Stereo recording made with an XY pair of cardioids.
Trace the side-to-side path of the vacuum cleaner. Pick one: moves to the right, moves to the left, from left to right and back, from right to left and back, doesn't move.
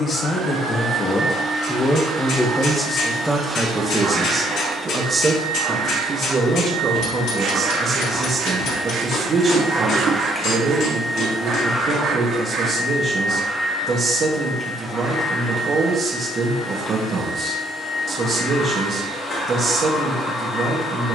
moves to the left.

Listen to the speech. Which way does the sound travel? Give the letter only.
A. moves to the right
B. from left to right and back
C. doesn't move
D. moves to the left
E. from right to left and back
A.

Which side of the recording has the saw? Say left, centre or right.
right.